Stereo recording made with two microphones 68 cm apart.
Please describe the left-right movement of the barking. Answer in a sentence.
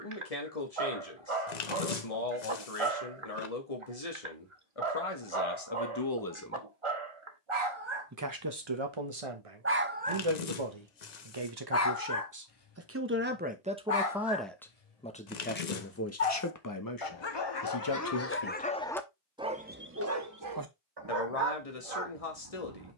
In this clip you hear the barking move from right to left and back again.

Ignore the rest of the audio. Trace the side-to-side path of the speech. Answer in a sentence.
In this clip you hear the speech move from left to right and back again.